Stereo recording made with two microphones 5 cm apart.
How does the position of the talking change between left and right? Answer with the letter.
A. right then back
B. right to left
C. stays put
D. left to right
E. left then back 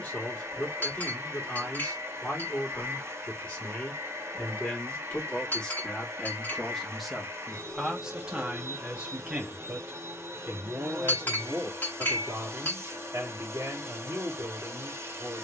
D.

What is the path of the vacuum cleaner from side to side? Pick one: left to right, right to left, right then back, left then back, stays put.
stays put.